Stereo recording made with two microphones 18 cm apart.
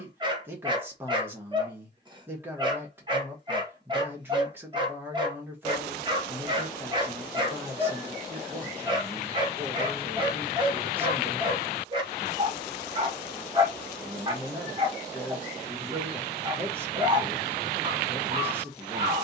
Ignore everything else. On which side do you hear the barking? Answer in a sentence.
You can hear the barking on the right.